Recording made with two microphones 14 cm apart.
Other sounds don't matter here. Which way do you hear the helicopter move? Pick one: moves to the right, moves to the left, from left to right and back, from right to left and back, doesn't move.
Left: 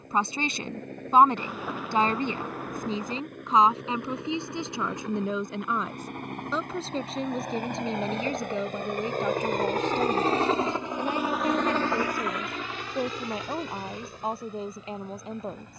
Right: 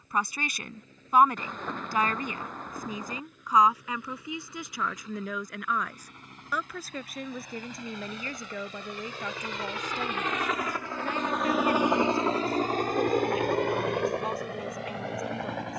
moves to the right.